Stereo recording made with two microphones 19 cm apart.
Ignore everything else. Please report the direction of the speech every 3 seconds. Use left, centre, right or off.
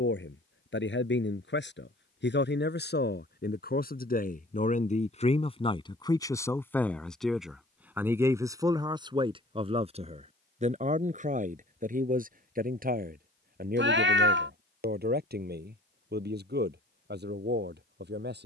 left, left, centre, right, right, right.